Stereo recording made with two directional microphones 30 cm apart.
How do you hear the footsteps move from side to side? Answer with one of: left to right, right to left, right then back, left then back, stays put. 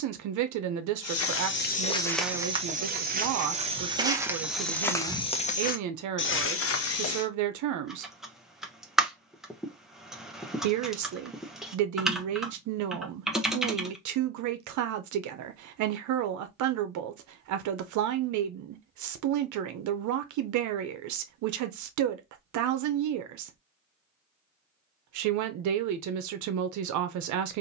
right then back.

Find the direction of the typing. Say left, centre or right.
centre.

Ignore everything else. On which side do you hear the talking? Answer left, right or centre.
right.